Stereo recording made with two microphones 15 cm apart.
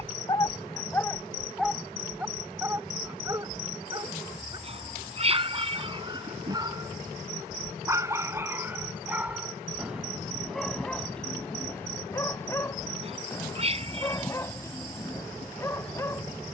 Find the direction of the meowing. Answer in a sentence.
In this clip you hear the meowing on the right.